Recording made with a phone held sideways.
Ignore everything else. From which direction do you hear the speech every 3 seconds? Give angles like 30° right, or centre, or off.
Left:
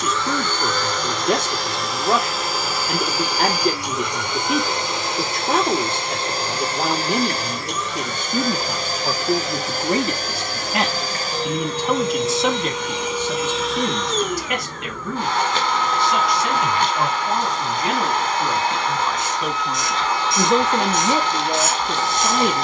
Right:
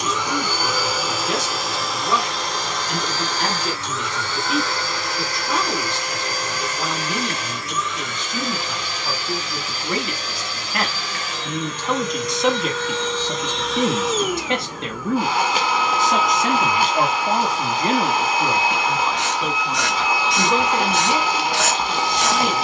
50° left, 50° left, 50° left, 30° left, 10° right, 40° right, centre, 40° left.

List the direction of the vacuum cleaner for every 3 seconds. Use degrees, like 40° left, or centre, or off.
centre, 20° left, 30° left, 40° left, 10° left, 10° right, 10° right, 10° right.